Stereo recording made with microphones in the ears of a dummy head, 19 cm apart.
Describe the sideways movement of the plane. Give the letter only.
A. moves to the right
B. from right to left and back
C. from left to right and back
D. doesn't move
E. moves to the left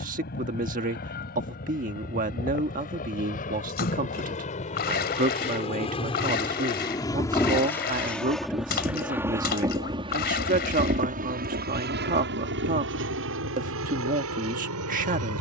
A.